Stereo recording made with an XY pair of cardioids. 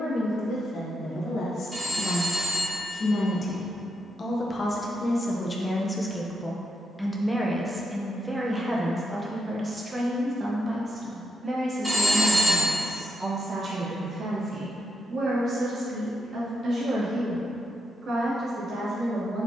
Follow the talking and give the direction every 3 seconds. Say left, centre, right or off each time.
left, left, centre, right, right, right, right.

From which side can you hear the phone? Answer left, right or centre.
centre.